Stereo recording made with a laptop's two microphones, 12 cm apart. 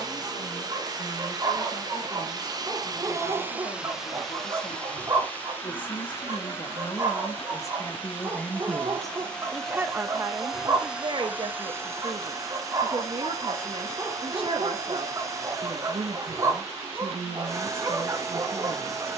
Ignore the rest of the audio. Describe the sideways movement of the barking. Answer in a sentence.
You can hear the barking stay in one place.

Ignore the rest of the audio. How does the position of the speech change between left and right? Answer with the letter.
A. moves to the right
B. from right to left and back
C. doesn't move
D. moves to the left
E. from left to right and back
A.